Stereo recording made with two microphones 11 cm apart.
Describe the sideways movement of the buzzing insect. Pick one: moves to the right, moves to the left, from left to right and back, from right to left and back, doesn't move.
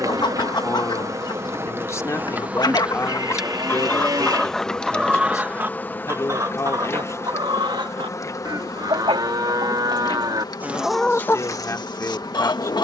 moves to the left.